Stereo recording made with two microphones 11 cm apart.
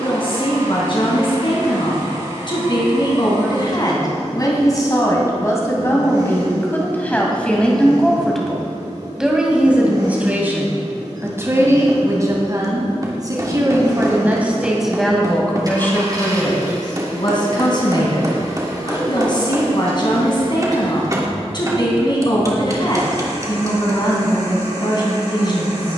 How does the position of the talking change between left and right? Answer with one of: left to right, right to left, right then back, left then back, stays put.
right then back.